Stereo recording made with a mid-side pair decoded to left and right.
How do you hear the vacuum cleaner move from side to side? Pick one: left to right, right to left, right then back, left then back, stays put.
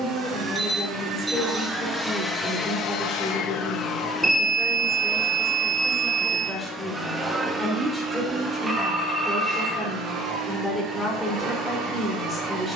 left then back.